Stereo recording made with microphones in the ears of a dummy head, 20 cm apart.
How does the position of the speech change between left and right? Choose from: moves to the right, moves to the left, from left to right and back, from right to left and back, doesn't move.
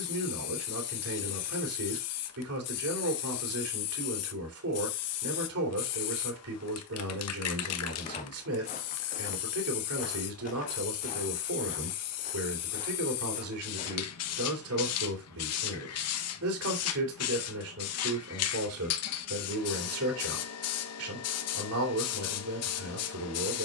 doesn't move.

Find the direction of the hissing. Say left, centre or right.
left.